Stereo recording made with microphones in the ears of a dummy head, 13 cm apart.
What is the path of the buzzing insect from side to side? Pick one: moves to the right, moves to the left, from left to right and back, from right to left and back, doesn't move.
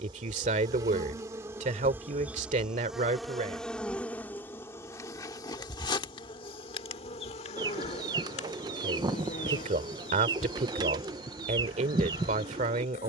moves to the left.